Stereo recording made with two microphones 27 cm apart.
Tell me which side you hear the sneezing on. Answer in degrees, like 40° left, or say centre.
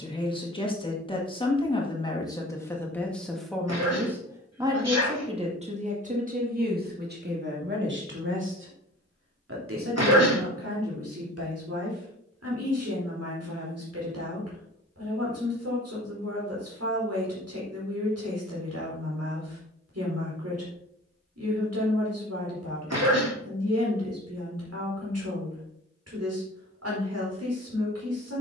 70° right.